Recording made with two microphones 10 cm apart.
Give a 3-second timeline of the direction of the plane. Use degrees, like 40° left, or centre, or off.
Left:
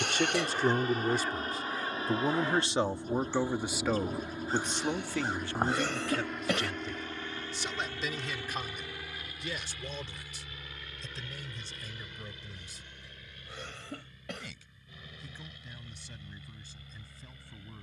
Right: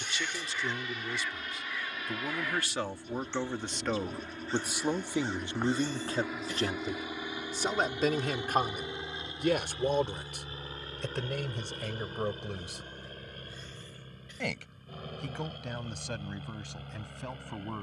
40° left, 10° left, 10° right, 30° right, 40° right, 50° right.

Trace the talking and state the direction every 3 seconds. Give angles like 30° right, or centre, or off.
40° left, 10° right, 40° right, 60° right, 70° right, 80° right.